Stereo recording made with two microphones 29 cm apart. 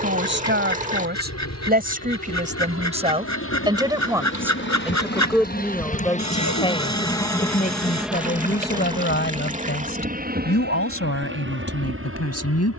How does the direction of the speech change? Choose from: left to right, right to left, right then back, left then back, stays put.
right to left.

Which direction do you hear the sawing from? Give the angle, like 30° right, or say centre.
70° left.